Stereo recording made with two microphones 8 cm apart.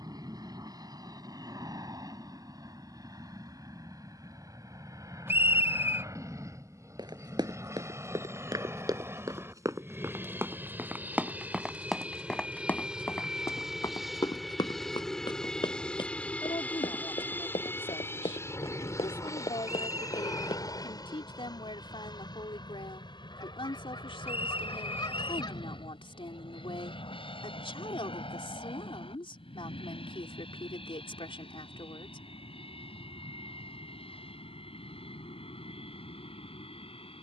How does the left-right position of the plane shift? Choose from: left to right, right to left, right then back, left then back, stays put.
right to left.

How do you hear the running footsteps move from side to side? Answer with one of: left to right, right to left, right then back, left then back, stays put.
right to left.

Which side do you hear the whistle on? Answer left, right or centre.
right.